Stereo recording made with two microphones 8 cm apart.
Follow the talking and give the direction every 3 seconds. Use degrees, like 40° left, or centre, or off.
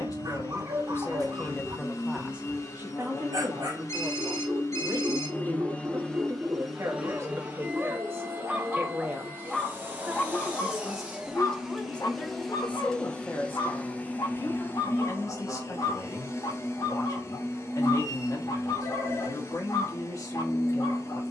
20° left, 50° right, 40° right, centre, 30° left, 50° left, 50° left.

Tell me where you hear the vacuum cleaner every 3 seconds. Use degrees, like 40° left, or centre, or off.
40° left, 40° left, 20° right, 20° right, 20° left, 40° left, 40° left.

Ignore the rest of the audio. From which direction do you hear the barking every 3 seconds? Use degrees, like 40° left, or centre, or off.
50° right, 50° right, 30° right, 30° left, 60° left, 70° left, 70° left.